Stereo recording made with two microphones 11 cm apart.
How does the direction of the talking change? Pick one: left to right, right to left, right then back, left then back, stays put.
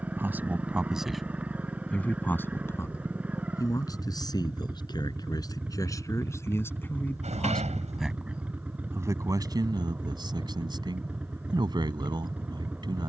left then back.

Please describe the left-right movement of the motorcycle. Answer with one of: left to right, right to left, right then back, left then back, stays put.
stays put.